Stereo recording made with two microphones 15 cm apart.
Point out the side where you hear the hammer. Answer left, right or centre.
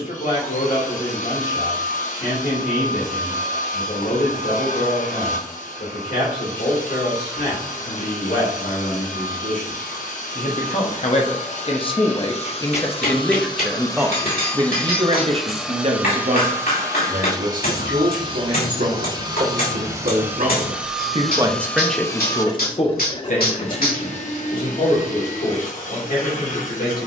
left.